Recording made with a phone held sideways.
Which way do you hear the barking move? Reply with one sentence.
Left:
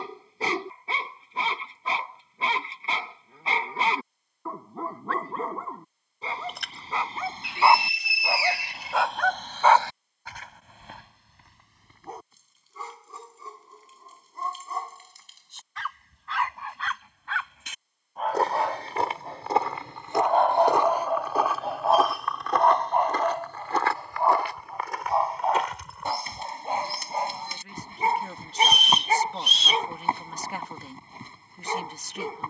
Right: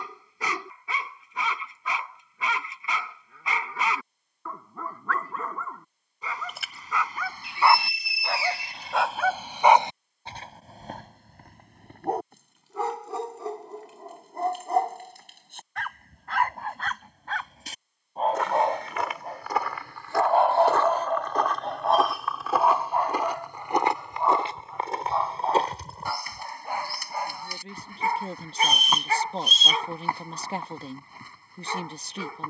In this clip you hear the barking go right and come back.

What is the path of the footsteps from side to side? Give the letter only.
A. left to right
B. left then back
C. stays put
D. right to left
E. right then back
A.